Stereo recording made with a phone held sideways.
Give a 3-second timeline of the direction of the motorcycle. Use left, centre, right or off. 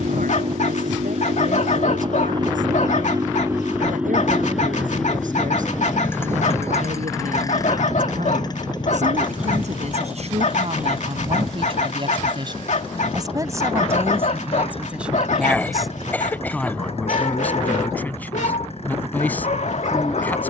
right, centre, left, left, left, left, left.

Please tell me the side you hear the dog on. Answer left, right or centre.
left.